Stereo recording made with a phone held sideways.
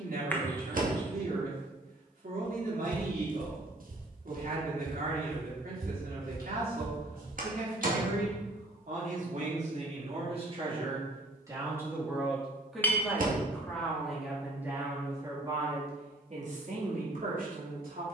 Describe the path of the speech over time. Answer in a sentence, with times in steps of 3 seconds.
In this clip you hear the speech on the right from 0 s, in the centre from 12 s and on the right from 15 s.